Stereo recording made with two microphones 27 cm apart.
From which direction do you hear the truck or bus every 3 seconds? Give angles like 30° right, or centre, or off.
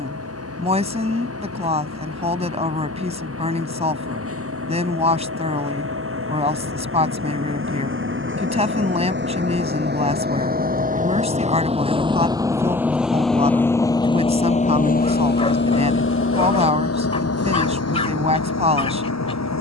60° right, 60° right, 50° right, 30° right, 10° left, 50° left, 70° left.